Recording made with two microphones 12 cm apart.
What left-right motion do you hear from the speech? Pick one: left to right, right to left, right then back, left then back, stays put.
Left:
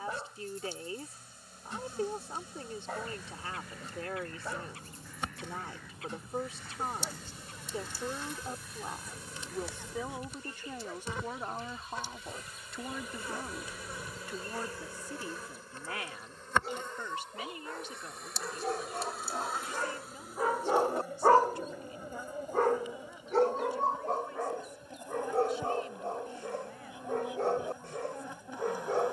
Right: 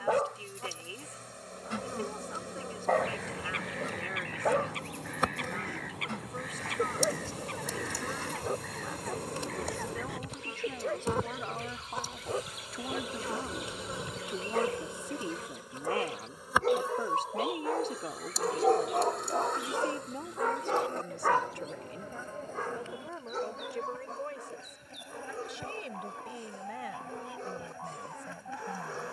left to right.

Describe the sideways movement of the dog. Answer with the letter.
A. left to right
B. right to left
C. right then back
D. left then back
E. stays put
B.